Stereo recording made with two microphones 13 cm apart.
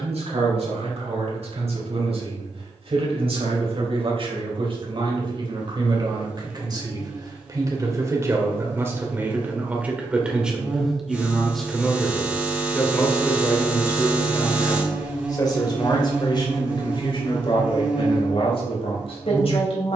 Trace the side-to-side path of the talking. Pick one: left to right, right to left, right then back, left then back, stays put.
right to left.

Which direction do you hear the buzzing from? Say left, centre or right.
centre.